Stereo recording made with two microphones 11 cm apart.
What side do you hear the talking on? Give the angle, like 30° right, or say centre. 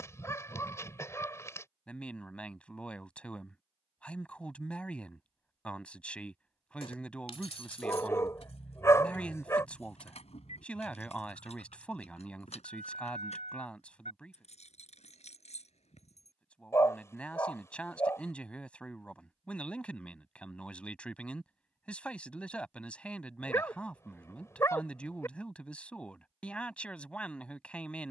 10° left.